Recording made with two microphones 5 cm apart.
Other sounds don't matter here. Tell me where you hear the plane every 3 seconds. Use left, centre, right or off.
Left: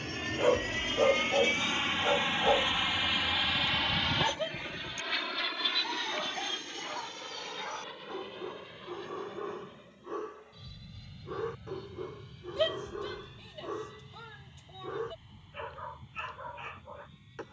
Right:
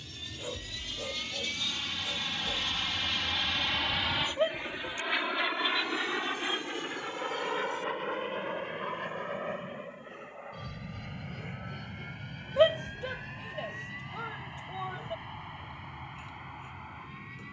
left, centre, right, right, right, right.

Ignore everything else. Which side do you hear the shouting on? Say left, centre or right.
right.